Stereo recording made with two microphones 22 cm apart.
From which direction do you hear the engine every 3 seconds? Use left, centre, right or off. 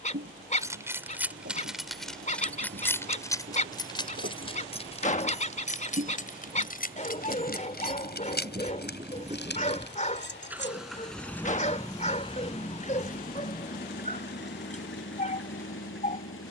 right, right, right, centre, left, left.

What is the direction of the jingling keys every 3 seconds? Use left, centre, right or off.
centre, left, left, left, off, off.